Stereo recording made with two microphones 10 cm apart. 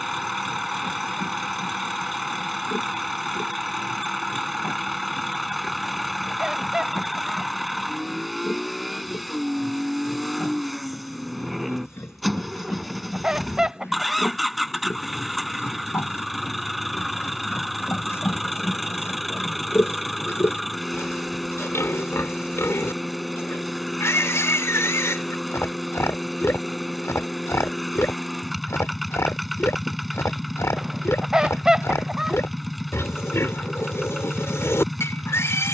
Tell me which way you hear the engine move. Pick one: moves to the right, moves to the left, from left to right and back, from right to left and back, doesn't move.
doesn't move.